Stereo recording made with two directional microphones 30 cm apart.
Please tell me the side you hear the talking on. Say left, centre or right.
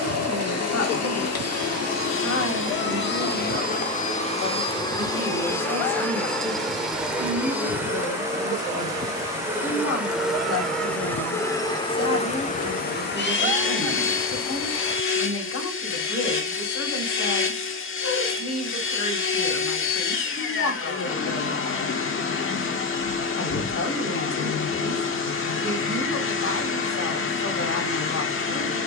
left.